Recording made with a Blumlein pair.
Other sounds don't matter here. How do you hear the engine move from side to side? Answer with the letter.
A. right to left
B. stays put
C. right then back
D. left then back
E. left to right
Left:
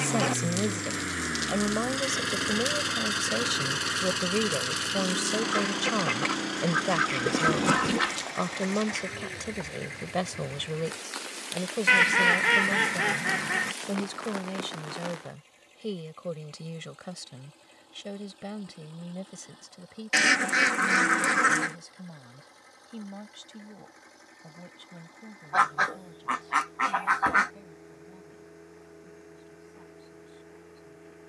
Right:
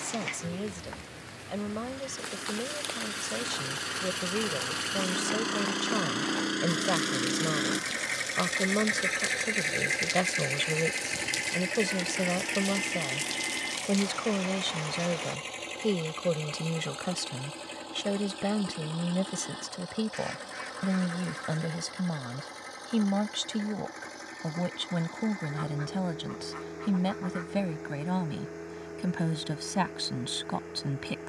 E.